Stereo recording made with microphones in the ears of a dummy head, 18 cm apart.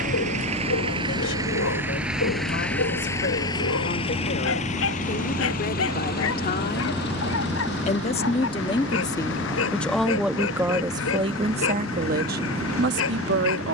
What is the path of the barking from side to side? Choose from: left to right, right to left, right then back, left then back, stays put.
stays put.